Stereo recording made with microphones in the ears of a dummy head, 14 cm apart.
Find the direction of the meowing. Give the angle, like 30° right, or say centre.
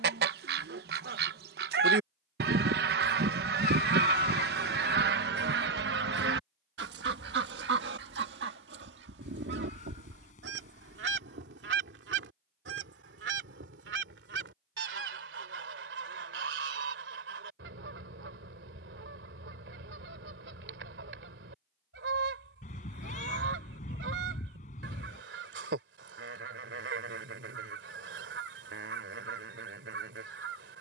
50° left.